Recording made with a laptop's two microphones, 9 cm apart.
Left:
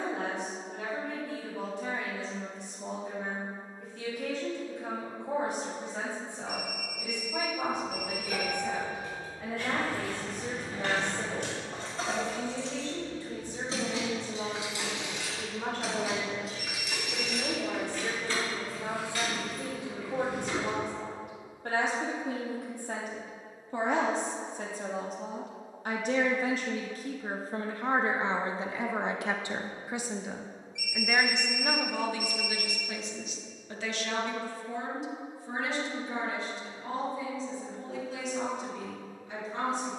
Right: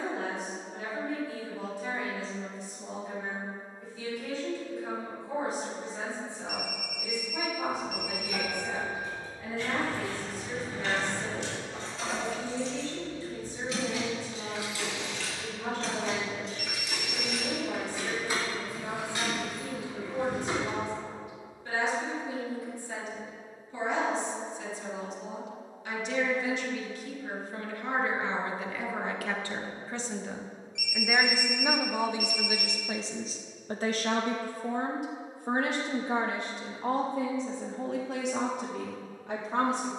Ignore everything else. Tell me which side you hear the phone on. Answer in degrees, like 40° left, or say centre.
60° right.